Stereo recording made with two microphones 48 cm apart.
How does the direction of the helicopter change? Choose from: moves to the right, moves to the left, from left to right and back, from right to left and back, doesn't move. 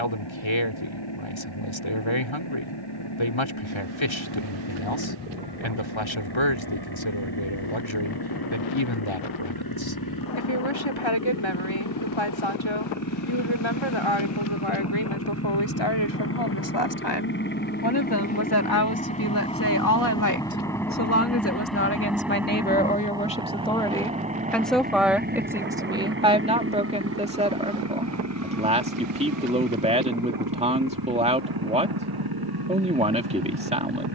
moves to the right.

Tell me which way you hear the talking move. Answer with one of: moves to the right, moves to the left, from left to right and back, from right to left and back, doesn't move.
moves to the right.